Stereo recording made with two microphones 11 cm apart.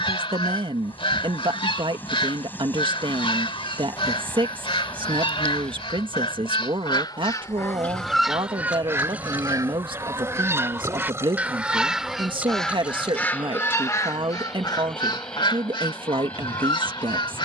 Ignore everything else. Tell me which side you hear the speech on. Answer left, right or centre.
right.